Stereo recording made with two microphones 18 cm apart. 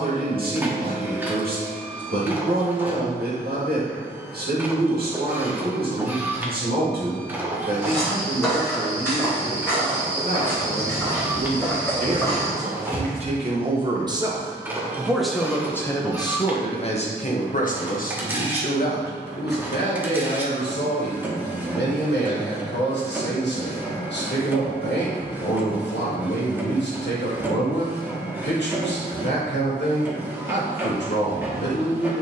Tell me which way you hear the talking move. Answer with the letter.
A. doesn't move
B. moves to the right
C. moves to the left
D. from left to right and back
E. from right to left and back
C.